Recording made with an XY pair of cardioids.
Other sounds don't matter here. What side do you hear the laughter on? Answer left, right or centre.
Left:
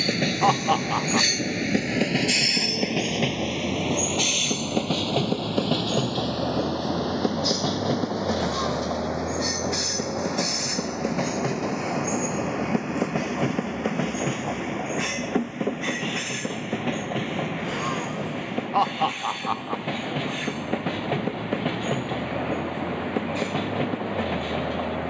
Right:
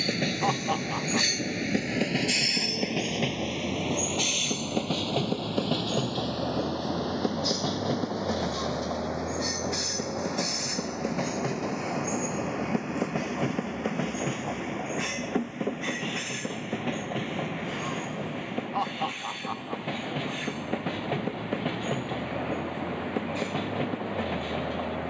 left.